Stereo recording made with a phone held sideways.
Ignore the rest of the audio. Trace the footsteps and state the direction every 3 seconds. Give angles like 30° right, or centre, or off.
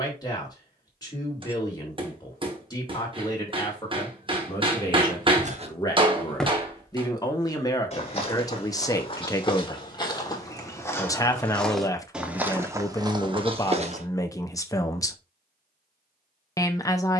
off, 40° right, 30° left, 20° left, 30° right, off.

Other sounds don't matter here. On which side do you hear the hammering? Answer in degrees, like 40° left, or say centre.
30° right.